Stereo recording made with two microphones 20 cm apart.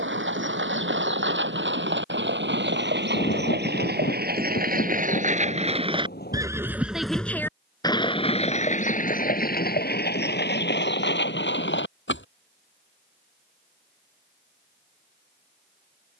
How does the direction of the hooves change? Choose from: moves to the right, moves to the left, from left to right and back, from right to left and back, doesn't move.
moves to the left.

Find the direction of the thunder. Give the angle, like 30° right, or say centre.
50° left.